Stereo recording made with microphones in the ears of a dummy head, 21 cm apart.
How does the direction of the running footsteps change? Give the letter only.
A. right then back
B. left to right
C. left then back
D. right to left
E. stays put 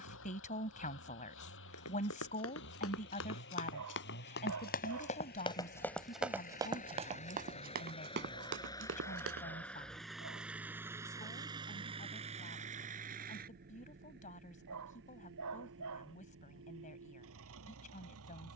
B.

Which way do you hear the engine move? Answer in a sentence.
You can hear the engine move from left to right.